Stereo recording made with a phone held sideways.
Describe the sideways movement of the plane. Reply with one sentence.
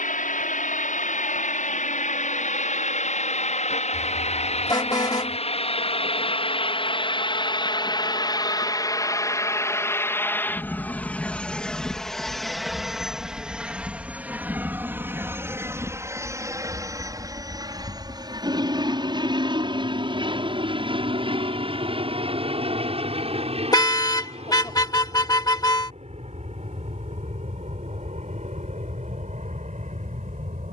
You can hear the plane move from left to right.